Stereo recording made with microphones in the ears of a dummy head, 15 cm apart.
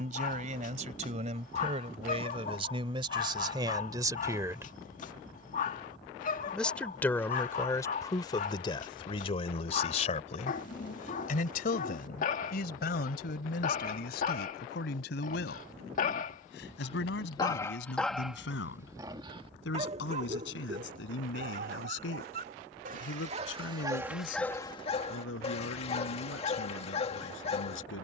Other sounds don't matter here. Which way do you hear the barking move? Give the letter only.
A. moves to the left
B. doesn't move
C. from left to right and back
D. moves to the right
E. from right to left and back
C.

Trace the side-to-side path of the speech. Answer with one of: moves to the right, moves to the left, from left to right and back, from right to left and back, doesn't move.
moves to the left.